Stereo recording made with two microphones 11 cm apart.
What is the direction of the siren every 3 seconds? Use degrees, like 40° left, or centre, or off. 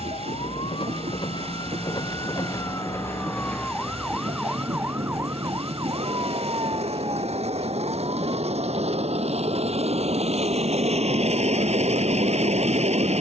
40° left, 10° right, 40° right, 60° right, 60° right.